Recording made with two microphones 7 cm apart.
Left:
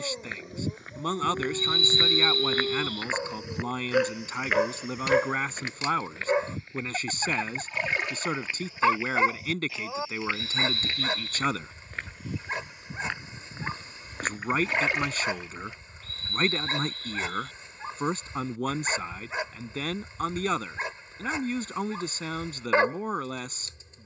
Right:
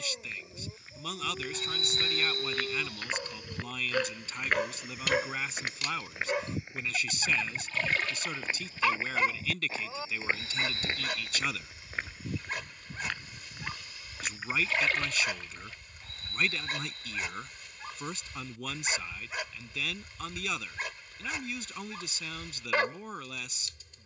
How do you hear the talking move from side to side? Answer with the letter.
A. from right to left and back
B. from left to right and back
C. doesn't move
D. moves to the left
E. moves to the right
C.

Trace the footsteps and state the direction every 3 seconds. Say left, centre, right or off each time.
left, centre, right, right, left, off, off, off.